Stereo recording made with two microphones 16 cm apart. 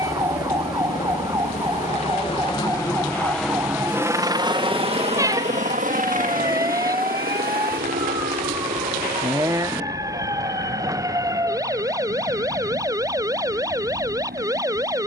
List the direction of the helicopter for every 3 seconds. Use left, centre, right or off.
left, right, right, right, right.